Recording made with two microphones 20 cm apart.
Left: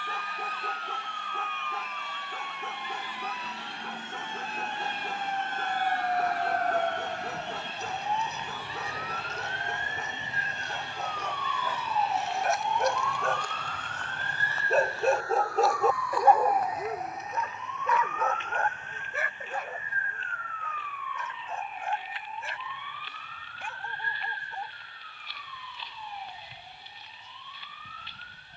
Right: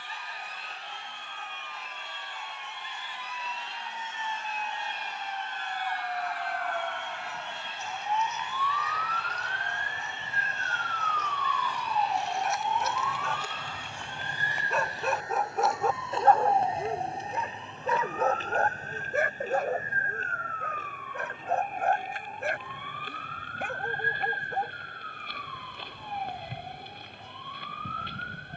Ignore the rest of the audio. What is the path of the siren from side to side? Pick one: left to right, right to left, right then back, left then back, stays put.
left to right.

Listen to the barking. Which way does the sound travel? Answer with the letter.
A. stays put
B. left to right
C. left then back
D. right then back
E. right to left
B.